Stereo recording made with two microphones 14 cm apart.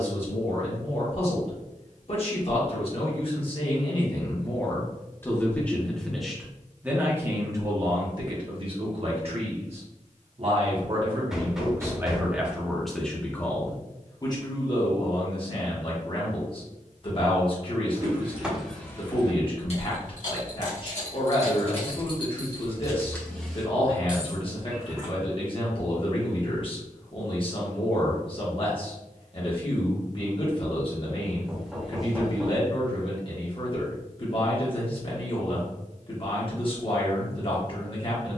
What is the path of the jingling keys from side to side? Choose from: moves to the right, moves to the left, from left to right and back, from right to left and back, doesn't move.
from right to left and back.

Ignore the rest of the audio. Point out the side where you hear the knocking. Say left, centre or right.
centre.